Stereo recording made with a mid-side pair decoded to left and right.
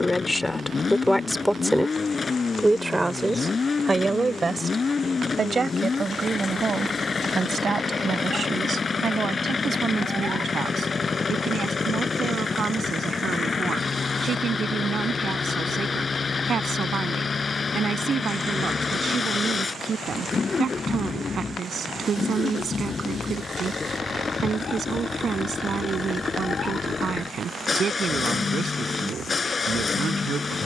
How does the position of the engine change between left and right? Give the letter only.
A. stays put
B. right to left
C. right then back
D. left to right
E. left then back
A.